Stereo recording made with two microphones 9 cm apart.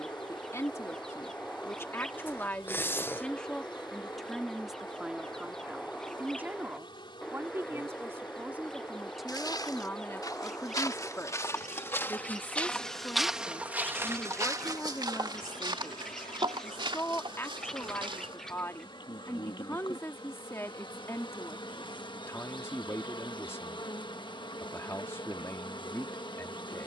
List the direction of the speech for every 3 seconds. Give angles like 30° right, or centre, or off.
30° left, centre, 20° right, 20° left, 30° left, 30° left, 30° left, 30° left, 30° left.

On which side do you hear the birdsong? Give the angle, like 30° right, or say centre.
10° left.